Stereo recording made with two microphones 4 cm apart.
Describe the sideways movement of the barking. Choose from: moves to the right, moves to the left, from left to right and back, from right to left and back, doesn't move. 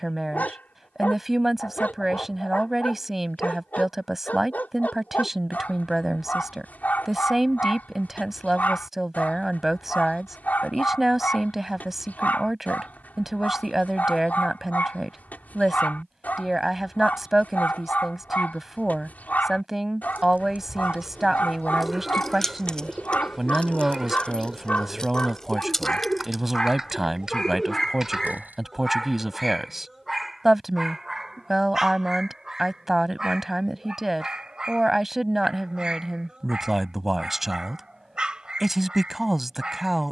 moves to the right.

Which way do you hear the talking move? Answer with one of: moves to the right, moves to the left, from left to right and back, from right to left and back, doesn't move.
doesn't move.